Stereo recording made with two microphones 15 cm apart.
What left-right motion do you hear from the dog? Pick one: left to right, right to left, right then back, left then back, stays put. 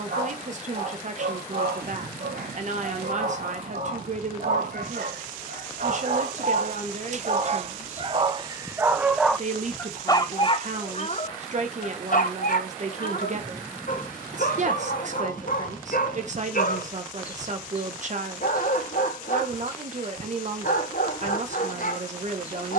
right to left.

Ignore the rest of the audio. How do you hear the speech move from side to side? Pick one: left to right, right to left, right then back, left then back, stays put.
stays put.